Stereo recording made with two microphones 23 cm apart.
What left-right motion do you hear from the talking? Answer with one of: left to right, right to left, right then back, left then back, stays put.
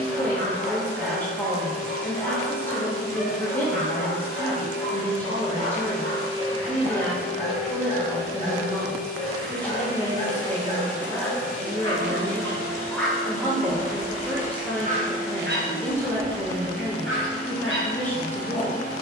stays put.